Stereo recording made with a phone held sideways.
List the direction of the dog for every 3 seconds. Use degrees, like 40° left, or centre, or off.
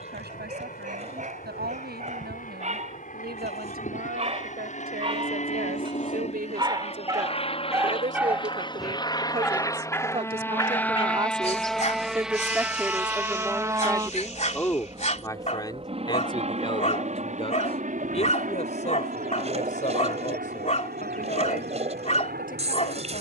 50° right, 40° right, 20° right, 30° left, 40° left, 40° left, 40° left, 40° left.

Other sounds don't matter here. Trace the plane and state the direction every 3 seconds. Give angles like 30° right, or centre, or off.
60° left, 50° left, 40° left, 10° left, 10° right, 40° right, 50° right, 60° right.